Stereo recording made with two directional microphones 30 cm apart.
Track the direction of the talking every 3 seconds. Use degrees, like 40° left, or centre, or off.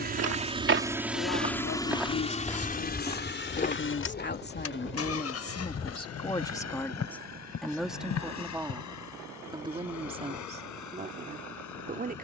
50° left, 30° left, centre, 20° right.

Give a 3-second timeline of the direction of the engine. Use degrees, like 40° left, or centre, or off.
centre, 40° left, 60° left, 60° left.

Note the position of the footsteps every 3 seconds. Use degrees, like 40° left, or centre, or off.
20° right, 30° left, 50° left, off.